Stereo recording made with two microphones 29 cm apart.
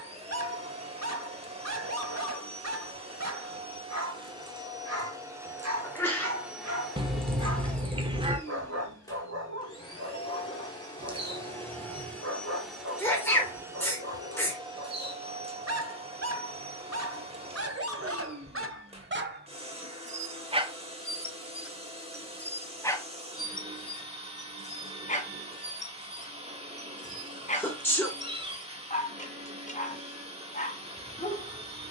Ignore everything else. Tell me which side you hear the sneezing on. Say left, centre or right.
centre.